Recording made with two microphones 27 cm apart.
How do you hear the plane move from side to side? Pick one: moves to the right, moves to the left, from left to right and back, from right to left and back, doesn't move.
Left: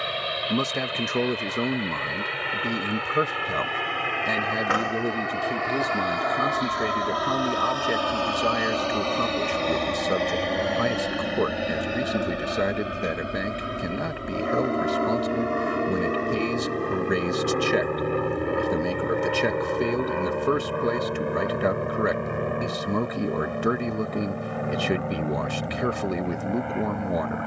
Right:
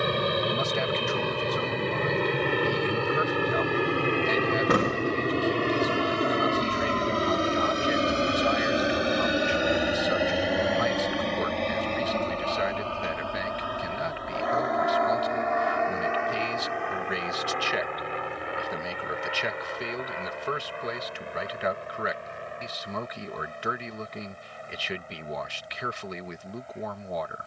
moves to the left.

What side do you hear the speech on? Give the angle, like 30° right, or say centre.
50° left.